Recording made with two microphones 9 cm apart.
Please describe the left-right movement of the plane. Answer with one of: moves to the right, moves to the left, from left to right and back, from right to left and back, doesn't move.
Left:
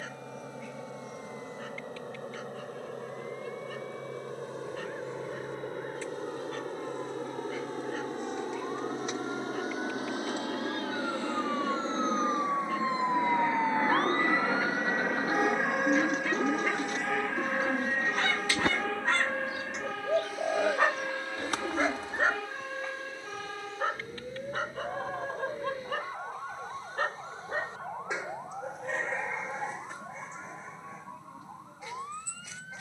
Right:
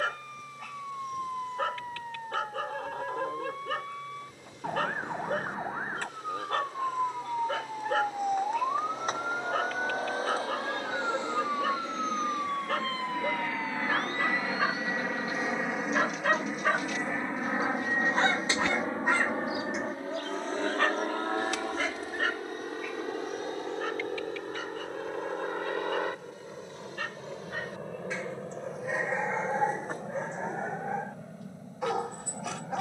moves to the right.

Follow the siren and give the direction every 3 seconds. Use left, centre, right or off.
right, right, right, right, left, left, left, left, left, left, left.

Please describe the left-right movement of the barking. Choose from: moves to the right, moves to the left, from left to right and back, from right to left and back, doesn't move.
from right to left and back.